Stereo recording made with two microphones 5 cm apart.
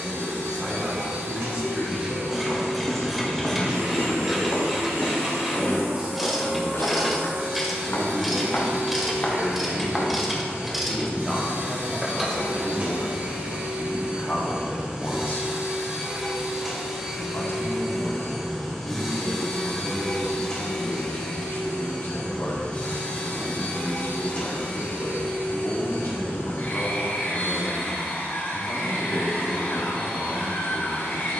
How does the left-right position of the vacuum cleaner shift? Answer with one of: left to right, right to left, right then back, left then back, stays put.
right to left.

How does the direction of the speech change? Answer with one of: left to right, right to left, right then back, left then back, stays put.
right to left.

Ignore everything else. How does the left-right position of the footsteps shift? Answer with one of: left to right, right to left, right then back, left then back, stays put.
left then back.